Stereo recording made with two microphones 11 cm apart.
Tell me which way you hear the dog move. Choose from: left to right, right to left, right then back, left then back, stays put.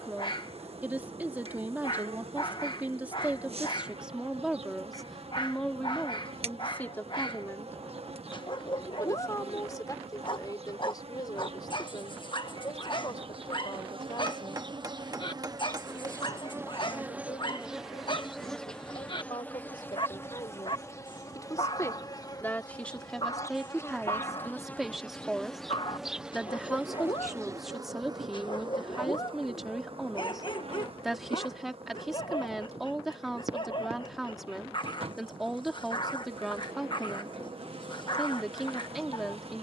stays put.